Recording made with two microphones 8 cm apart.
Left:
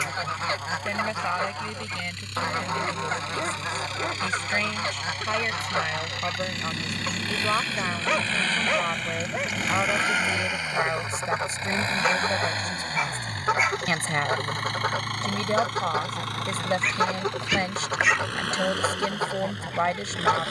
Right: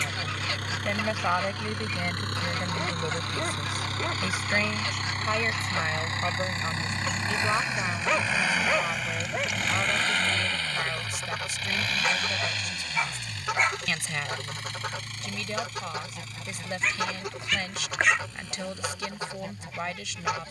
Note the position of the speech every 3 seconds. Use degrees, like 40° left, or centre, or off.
10° right, centre, 10° left, 30° left, 40° left, 40° left, 40° left.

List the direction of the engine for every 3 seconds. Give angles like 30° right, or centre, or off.
50° right, 40° right, 20° right, 10° left, 40° left, 60° left, 70° left.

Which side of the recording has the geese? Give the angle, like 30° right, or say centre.
30° left.